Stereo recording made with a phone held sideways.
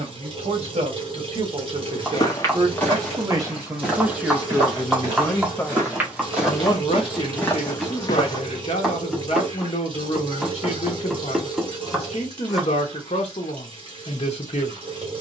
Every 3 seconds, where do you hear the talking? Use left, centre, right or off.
right, centre, left, left, left.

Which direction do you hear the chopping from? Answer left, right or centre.
centre.